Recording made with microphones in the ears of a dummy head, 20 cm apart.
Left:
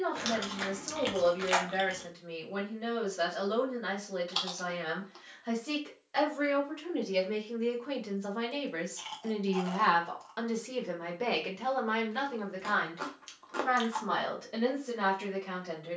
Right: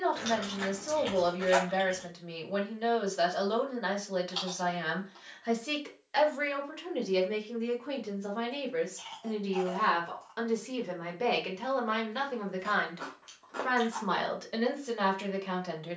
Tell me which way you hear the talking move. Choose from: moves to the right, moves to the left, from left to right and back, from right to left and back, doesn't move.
from right to left and back.